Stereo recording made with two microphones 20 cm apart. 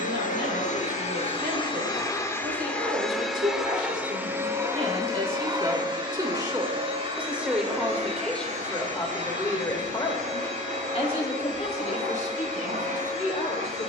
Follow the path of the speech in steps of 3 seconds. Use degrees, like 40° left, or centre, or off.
60° right, 40° right, centre, 20° left, 40° left.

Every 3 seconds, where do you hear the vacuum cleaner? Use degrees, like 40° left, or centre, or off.
30° left, 10° right, 30° right, 40° right, 40° right.